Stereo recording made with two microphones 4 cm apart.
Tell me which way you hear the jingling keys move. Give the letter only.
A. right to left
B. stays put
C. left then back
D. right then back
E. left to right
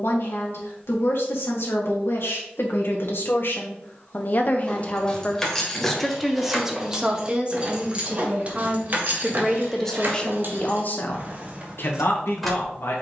D.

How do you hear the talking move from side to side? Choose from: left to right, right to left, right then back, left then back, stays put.
right then back.